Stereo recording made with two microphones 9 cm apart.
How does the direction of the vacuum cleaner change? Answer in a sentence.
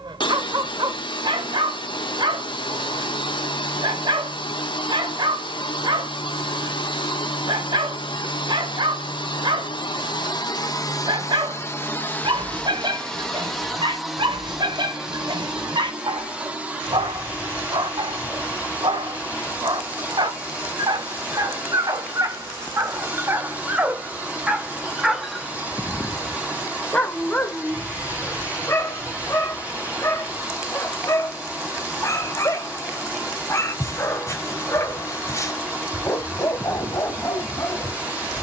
In this clip you hear the vacuum cleaner travel towards the right.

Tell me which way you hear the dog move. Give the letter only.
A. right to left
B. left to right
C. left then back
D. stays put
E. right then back
A.